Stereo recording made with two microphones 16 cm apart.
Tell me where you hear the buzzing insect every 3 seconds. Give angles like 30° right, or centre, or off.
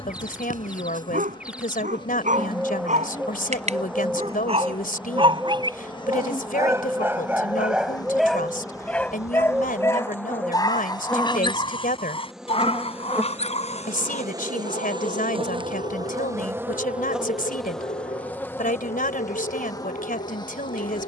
30° left, 30° left, 30° left, 10° left, 10° right, 20° right, 20° left.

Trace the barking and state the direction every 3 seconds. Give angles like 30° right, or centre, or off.
60° right, 40° right, 10° right, 20° left, 40° left, 50° left, 60° left.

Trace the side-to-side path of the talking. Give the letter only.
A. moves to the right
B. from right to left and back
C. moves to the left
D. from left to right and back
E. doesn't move
E.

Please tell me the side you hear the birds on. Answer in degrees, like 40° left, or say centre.
10° right.